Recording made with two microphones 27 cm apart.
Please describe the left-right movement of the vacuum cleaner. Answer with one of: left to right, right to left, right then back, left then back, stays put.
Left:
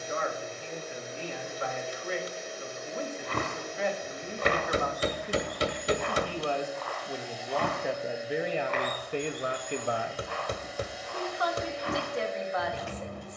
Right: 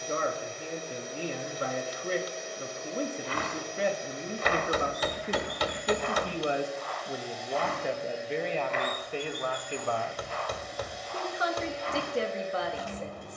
stays put.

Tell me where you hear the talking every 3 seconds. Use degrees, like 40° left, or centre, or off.
40° right, 30° right, centre, centre, 30° right.